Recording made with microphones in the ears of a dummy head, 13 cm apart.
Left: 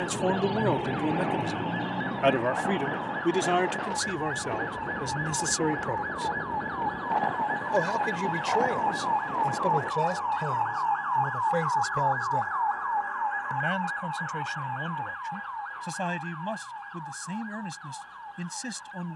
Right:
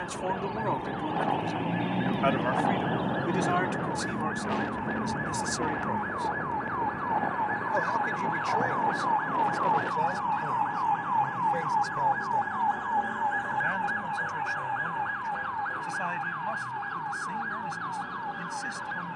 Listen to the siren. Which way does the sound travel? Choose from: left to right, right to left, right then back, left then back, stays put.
left to right.